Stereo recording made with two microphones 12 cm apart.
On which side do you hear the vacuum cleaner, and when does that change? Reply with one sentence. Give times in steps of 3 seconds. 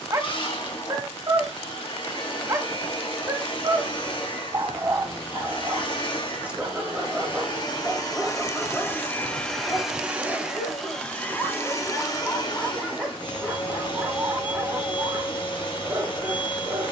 You can hear the vacuum cleaner on the left from 0 s, in the centre from 9 s and on the left from 12 s.